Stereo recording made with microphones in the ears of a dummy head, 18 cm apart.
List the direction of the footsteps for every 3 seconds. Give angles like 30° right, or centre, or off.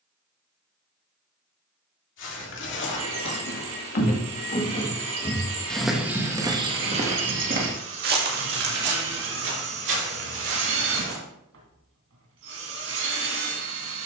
60° left, 30° left, 40° right, 60° right, off.